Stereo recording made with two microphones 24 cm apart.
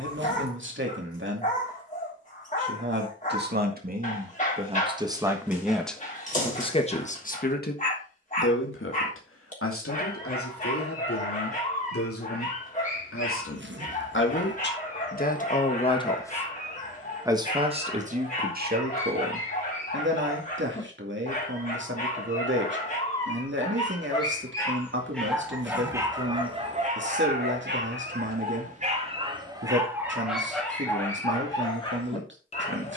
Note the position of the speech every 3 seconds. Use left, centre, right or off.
right, right, left, left, left, centre, right, right, right, right, right.